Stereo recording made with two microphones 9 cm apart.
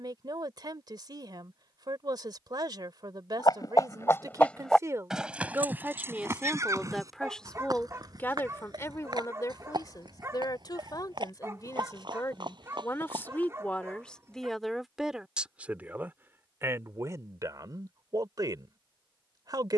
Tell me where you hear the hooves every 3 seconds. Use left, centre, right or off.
off, centre, right, right, right, off, off.